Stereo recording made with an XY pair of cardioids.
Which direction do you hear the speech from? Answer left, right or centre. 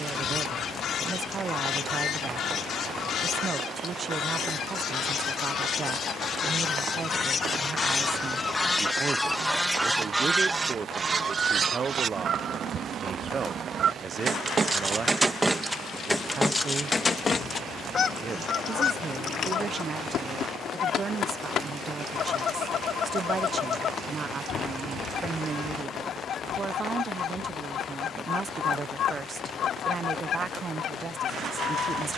right.